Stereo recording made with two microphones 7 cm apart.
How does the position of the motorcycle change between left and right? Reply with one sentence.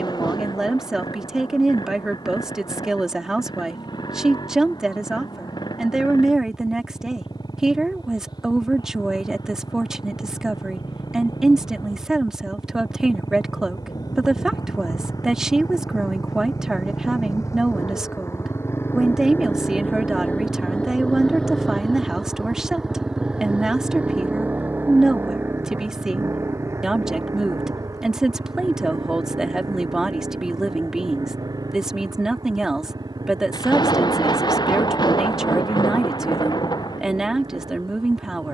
You can hear the motorcycle move to the right.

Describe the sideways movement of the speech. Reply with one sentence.
In this clip you hear the speech stay put.